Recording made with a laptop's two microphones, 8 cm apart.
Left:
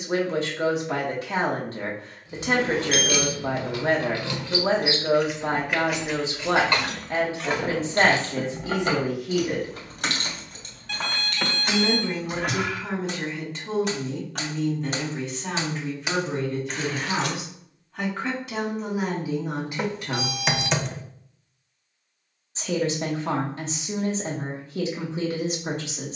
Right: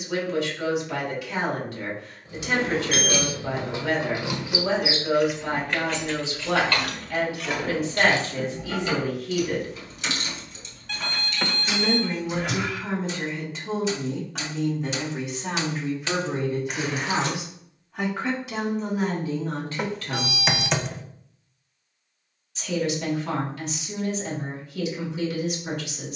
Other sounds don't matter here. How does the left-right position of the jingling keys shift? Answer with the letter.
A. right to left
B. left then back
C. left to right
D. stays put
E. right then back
B.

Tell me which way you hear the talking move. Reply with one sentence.
You can hear the talking go right and come back.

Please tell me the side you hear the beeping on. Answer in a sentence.
You can hear the beeping in the centre.